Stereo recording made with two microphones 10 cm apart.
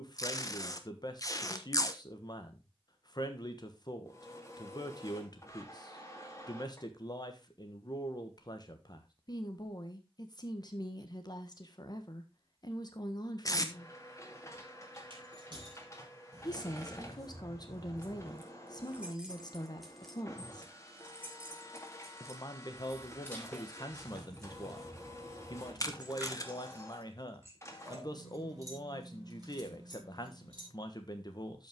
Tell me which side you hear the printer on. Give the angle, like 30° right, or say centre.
30° left.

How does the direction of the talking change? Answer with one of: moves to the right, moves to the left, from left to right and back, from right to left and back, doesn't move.
doesn't move.